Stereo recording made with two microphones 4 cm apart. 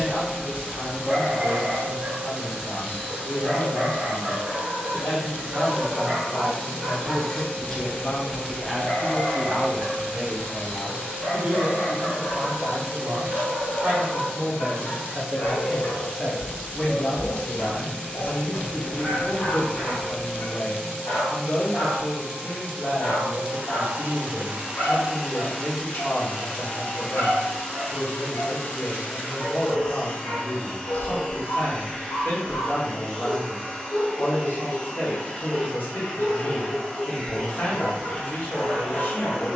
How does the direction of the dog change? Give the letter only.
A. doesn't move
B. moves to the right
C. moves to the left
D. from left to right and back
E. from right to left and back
C.